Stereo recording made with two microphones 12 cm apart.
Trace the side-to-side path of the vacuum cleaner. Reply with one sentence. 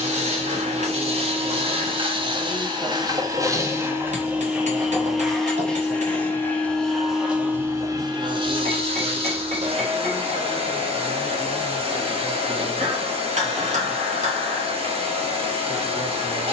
You can hear the vacuum cleaner go left and come back.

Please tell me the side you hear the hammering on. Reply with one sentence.
In this clip you hear the hammering on the right.